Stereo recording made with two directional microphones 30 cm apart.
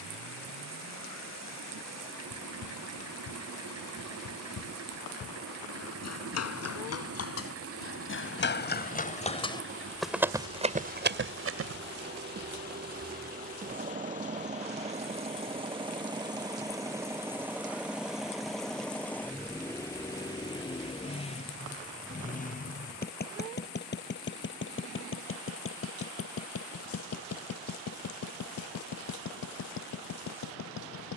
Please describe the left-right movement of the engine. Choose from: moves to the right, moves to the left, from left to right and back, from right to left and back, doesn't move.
moves to the left.